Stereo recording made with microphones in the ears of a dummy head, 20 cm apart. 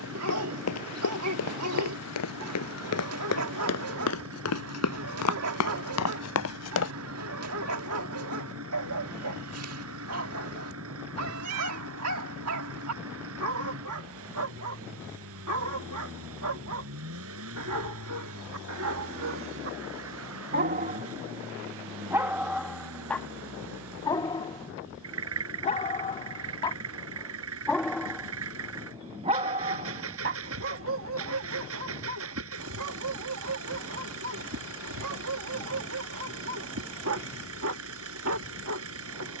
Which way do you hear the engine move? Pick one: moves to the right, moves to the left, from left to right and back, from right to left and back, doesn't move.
doesn't move.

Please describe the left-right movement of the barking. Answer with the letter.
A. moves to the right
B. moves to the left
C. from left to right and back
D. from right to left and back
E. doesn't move
D.